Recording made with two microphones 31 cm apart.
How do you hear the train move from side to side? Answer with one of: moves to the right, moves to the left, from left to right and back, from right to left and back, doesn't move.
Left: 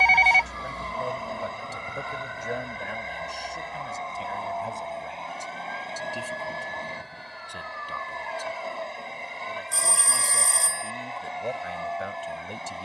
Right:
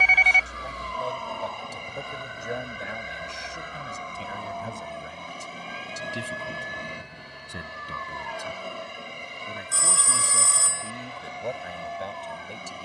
doesn't move.